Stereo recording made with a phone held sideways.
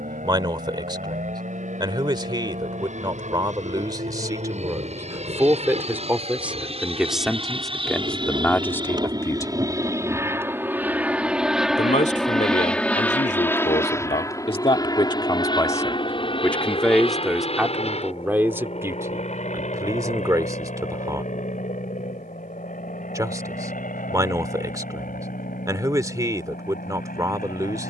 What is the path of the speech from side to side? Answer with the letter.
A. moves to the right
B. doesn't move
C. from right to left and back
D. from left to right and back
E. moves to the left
C.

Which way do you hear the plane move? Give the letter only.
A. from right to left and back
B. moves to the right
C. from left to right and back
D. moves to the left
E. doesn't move
D.